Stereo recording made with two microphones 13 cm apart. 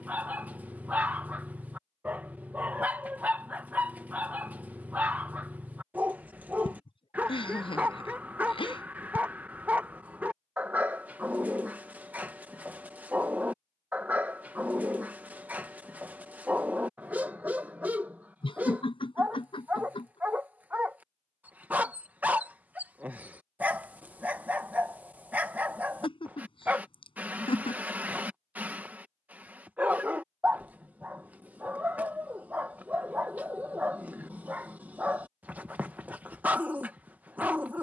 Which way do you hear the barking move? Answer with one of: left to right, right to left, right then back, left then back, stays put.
stays put.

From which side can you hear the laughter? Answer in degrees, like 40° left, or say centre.
40° left.